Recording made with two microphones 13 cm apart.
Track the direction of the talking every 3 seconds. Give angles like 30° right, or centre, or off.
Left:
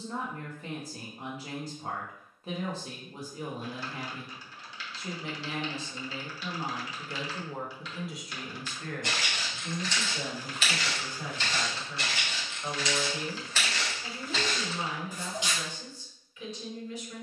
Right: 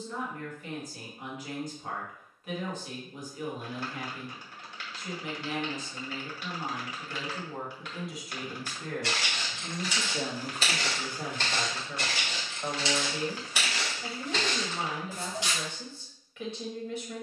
30° left, 30° left, 10° left, 50° right, 60° right, 60° right.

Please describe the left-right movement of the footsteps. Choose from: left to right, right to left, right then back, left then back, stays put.
right then back.